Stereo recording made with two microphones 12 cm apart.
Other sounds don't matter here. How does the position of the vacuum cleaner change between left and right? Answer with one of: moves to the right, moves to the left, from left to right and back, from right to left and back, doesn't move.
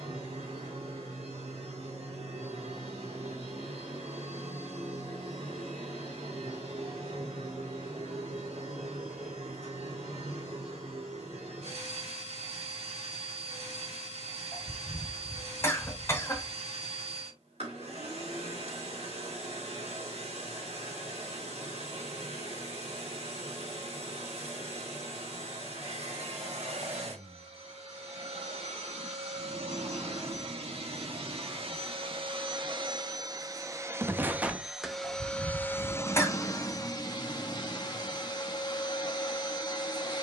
moves to the left.